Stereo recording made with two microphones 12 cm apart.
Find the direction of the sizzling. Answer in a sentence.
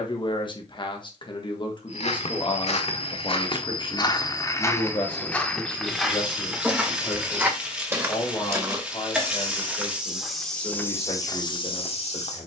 You can hear the sizzling in the centre.